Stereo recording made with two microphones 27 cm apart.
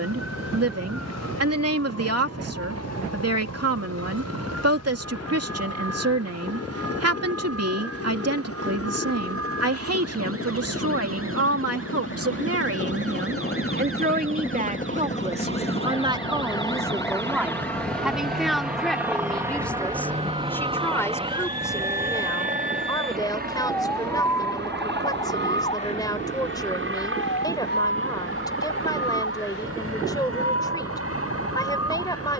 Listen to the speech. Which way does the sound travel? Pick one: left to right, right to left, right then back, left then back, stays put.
right to left.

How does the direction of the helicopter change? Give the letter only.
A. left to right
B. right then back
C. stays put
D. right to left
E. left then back
A.